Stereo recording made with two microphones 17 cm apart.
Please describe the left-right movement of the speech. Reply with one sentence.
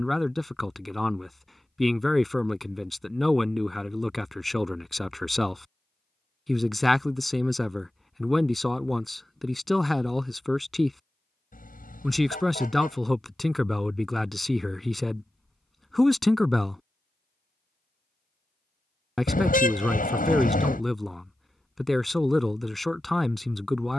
You can hear the speech stay in one place.